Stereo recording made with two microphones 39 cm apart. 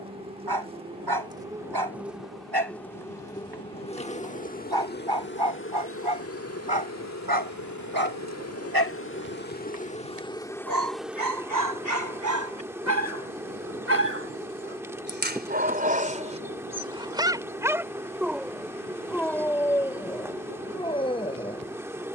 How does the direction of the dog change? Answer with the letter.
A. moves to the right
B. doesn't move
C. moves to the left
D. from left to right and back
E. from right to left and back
C.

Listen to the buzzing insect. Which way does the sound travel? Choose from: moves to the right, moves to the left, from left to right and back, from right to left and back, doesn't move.
from right to left and back.